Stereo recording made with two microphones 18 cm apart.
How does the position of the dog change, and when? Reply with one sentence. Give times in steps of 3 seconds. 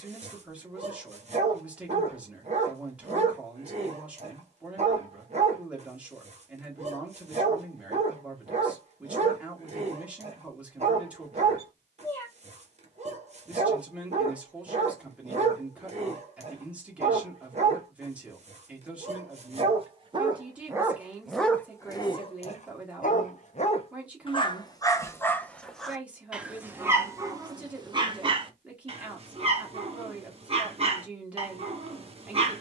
You can hear the dog on the right from 0 s, on the left from 21 s, in the centre from 24 s and on the right from 27 s.